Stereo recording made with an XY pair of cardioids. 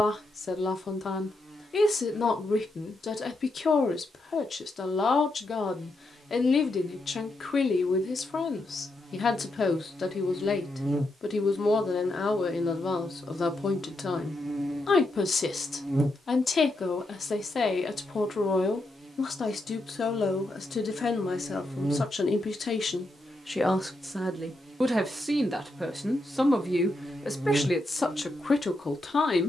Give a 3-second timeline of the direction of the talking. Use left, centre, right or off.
left, left, left, left, left, left, left, left, centre, left.